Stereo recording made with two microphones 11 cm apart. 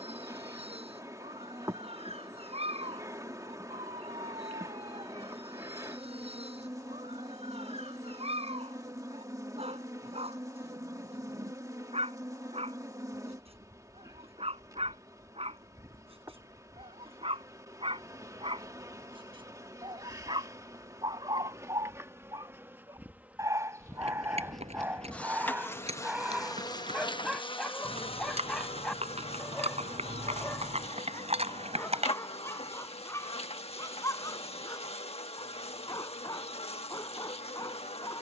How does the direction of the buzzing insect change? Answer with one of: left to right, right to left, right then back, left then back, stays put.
right to left.